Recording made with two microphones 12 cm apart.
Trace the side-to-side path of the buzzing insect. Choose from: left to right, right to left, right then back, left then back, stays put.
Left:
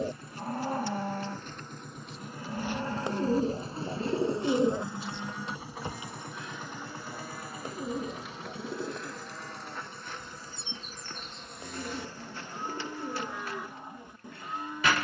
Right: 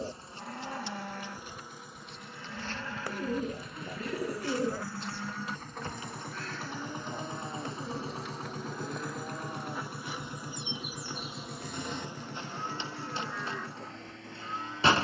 left then back.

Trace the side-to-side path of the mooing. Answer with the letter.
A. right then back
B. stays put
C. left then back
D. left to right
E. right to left
A.